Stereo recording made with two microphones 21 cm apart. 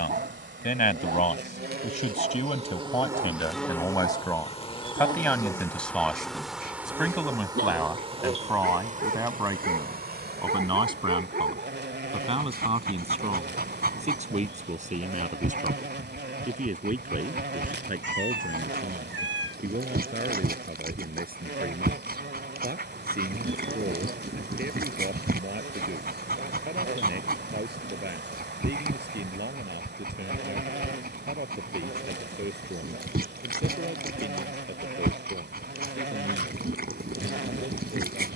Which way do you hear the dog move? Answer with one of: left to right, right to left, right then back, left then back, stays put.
stays put.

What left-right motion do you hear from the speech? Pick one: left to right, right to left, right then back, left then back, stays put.
left to right.